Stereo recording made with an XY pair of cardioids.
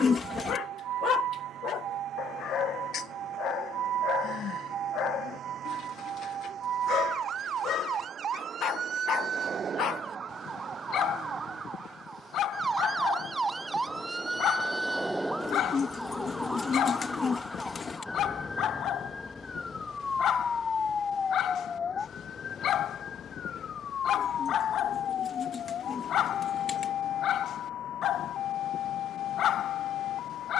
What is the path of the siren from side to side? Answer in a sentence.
In this clip you hear the siren go from the right side to the left.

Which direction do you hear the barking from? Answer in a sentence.
You can hear the barking on the left.